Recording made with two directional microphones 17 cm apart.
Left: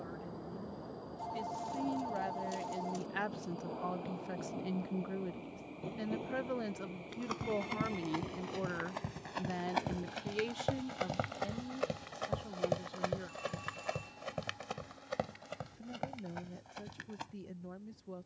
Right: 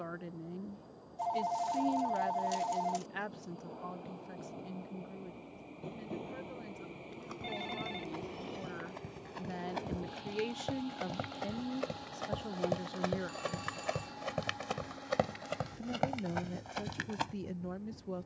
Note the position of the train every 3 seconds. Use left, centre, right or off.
left, left, centre, right, right, right.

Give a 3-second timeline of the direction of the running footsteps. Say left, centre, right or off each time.
off, off, left, left, centre, right.